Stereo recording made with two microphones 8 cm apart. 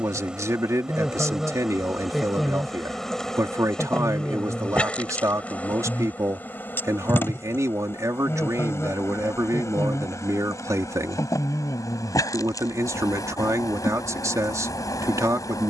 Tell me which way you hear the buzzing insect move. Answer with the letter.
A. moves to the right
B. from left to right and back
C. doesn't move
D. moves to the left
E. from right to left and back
D.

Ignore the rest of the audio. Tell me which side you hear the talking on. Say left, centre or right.
right.